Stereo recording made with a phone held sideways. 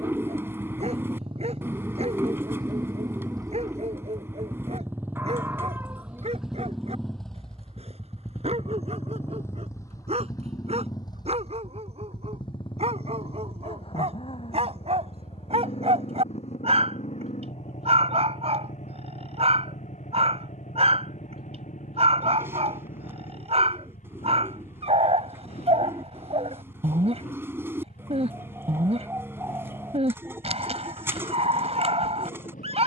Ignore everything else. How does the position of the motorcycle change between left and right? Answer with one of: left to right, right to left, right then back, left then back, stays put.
right to left.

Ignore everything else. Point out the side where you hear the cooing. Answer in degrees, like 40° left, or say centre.
20° right.